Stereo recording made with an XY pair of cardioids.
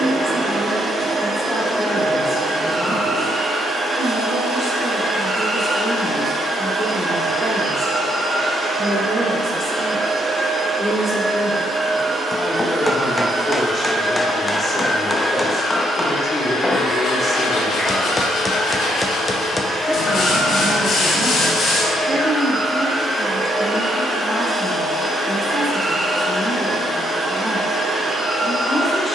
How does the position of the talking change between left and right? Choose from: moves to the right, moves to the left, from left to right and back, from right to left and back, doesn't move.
from left to right and back.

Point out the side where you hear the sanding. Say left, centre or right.
left.